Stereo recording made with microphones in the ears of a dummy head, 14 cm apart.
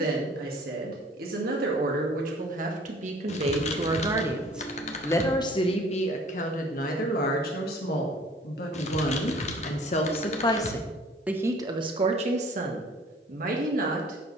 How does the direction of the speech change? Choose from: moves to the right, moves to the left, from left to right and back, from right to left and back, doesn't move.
from right to left and back.